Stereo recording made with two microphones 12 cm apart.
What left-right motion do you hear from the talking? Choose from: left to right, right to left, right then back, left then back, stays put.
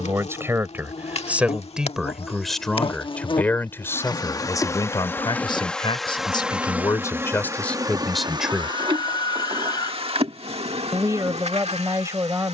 left then back.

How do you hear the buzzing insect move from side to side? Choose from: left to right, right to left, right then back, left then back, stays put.
left to right.